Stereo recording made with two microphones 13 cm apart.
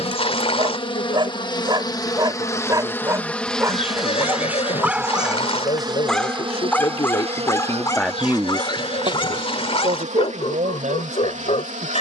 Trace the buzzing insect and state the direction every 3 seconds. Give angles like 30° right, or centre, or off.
30° left, 10° right, 50° right, 70° right.